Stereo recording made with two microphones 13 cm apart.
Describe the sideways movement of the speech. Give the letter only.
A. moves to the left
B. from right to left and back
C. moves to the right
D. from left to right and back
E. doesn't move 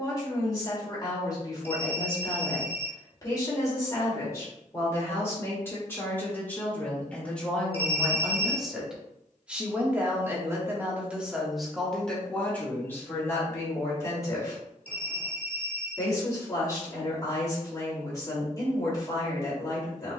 D.